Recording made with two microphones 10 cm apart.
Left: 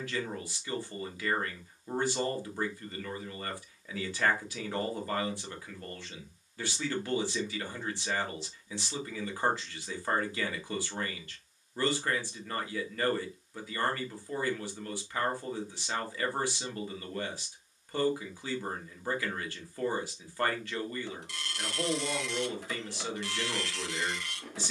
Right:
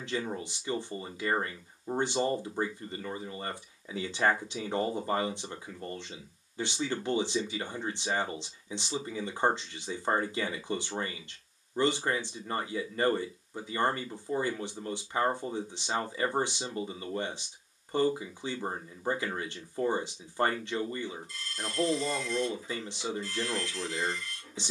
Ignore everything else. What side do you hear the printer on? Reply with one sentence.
You can hear the printer on the left.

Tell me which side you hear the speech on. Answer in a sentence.
In this clip you hear the speech on the right.